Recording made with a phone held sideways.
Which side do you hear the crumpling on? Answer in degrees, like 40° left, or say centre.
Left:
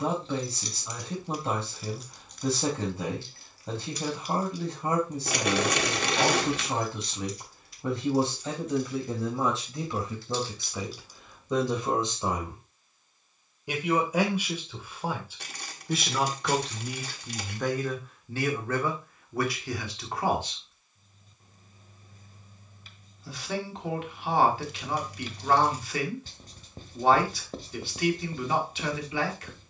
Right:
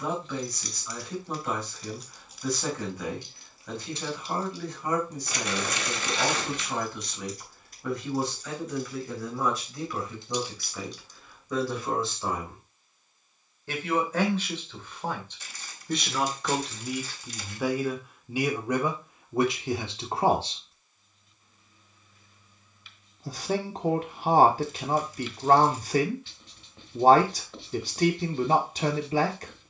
70° left.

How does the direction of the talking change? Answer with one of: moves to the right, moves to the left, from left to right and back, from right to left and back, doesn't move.
moves to the right.